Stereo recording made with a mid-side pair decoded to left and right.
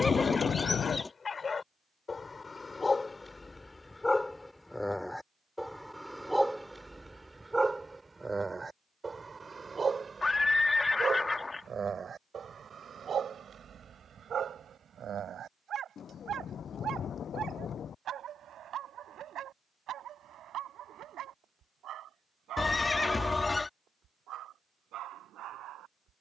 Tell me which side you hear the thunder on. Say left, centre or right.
left.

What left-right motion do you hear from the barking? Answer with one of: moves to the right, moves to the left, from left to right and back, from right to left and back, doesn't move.
moves to the right.